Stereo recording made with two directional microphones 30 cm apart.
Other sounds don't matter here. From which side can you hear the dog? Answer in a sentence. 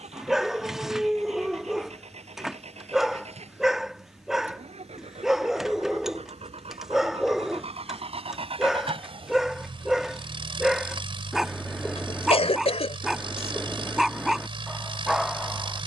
In this clip you hear the dog in the centre.